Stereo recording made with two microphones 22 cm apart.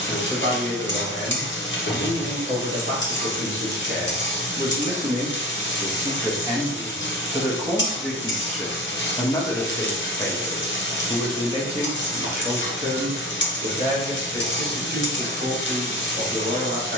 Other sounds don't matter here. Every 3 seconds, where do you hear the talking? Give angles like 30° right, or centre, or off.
50° right, 40° right, 10° right, centre, 40° right, 50° right.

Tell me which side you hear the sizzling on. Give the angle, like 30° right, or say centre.
60° left.